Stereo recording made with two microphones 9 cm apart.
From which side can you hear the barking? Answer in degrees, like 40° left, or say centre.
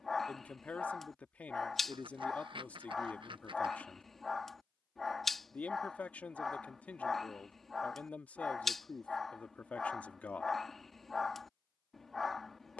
centre.